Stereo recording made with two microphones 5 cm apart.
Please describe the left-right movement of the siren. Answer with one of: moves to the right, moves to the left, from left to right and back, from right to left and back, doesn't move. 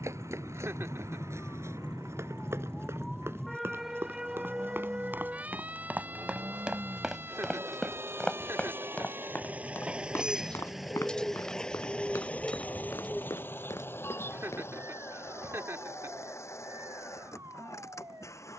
moves to the right.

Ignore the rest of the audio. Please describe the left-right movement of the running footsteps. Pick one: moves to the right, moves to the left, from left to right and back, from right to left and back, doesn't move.
moves to the left.